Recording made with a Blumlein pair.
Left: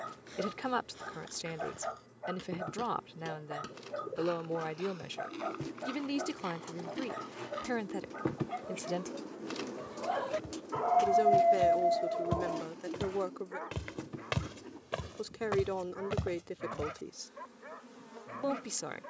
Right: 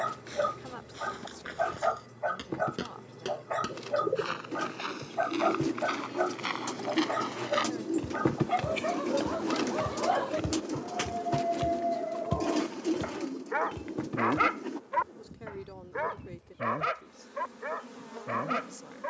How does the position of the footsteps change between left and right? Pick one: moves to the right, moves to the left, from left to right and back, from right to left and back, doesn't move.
moves to the left.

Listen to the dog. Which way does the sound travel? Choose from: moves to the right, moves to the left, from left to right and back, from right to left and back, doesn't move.
from right to left and back.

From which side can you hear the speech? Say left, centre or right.
left.